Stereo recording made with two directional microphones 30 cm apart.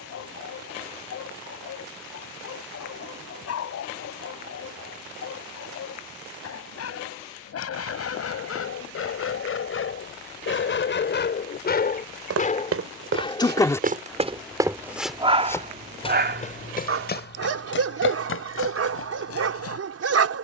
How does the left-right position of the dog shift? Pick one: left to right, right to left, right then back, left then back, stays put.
left to right.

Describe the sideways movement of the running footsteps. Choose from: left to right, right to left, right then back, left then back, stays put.
right to left.